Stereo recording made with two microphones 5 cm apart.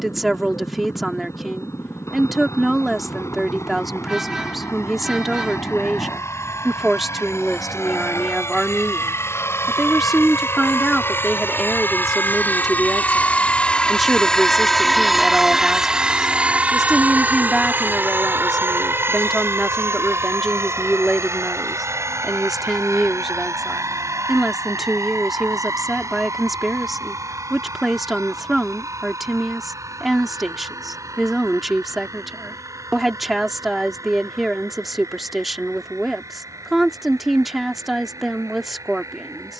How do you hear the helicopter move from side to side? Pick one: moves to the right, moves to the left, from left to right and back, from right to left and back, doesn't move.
moves to the right.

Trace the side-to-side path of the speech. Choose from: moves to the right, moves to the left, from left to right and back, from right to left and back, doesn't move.
doesn't move.